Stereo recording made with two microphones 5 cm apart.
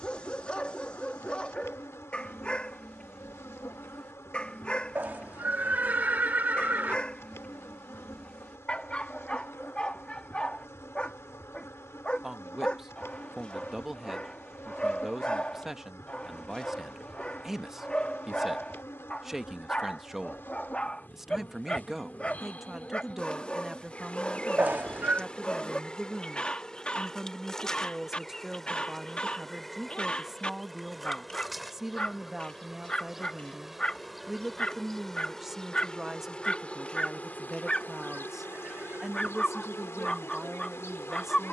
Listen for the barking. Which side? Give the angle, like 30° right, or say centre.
20° left.